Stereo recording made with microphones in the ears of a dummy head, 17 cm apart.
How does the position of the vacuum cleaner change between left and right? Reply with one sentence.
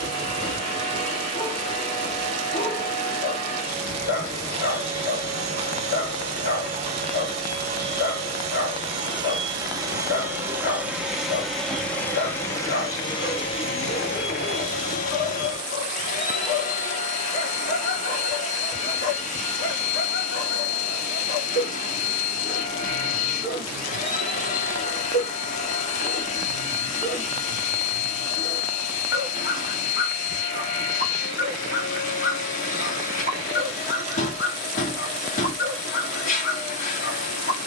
In this clip you hear the vacuum cleaner move from right to left.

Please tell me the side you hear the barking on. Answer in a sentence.
You can hear the barking on the left.